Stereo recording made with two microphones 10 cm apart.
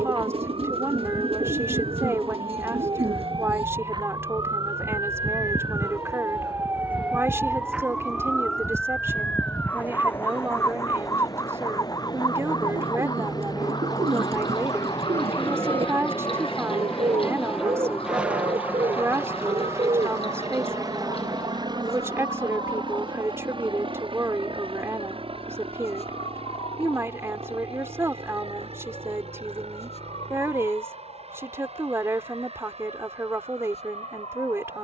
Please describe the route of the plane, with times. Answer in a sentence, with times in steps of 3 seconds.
In this clip you hear the plane on the left from 0 s, in the centre from 15 s and on the right from 18 s.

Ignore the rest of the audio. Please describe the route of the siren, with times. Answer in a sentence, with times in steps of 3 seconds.
In this clip you hear the siren on the right from 0 s, in the centre from 6 s and on the left from 9 s.